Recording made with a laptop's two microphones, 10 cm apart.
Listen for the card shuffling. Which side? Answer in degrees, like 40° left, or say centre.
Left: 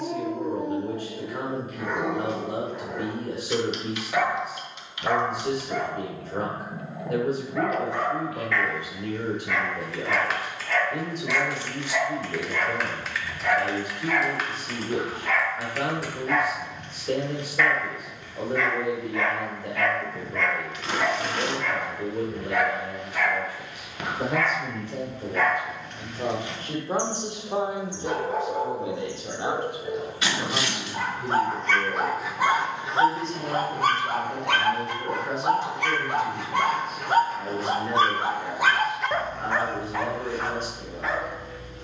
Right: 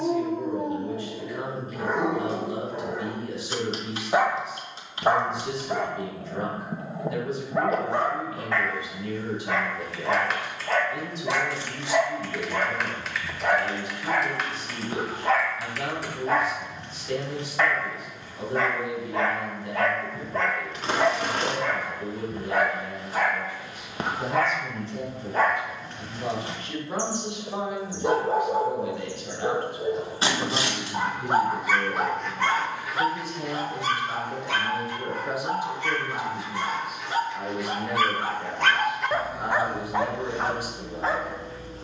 30° right.